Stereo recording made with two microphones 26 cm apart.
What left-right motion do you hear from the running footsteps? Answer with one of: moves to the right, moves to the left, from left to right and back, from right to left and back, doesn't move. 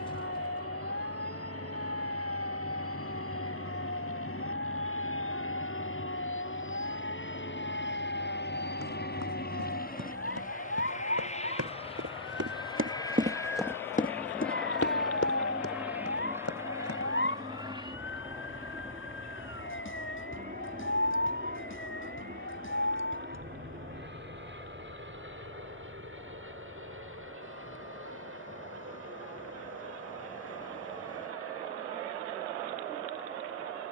moves to the left.